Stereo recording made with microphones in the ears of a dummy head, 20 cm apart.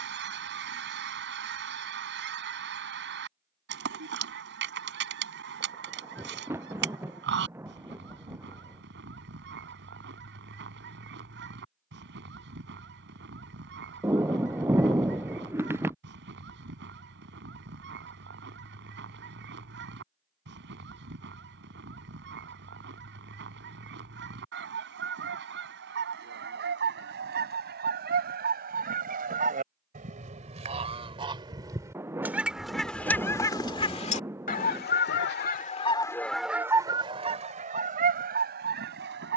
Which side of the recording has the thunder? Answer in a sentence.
In this clip you hear the thunder in the centre.